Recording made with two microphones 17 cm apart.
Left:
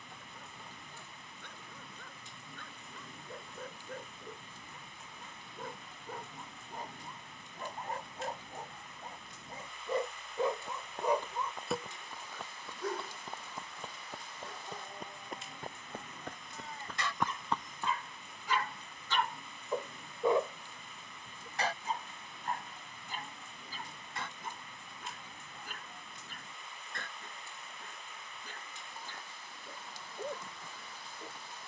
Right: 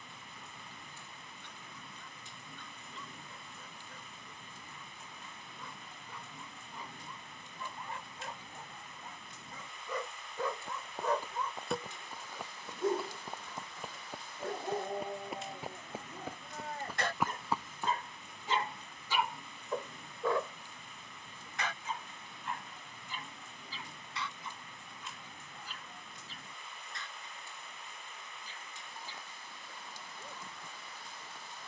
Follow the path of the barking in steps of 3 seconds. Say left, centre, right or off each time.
left, left, left, left, right, right, centre, left, left, left, left.